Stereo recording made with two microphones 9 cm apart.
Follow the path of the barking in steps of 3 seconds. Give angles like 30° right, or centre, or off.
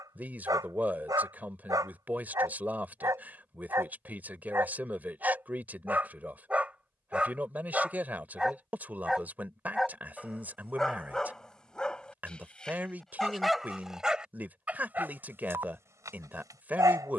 40° right, 30° right, 10° right, centre, centre, 30° right.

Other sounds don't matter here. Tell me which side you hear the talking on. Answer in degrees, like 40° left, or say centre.
20° right.